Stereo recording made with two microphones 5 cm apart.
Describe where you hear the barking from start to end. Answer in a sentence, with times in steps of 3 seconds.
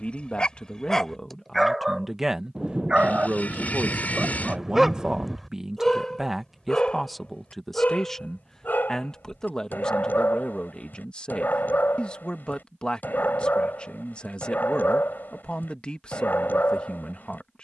In this clip you hear the barking in the centre from 0 s and on the left from 6 s.